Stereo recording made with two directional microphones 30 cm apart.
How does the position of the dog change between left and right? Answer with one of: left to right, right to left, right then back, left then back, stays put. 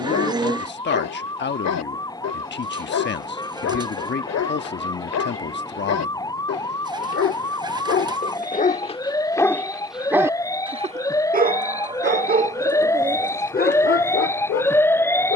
right then back.